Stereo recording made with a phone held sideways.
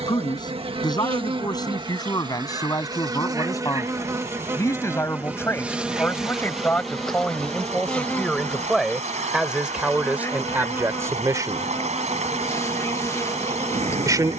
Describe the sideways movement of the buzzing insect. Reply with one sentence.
In this clip you hear the buzzing insect go from the right side to the left.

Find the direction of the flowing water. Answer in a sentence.
You can hear the flowing water on the right.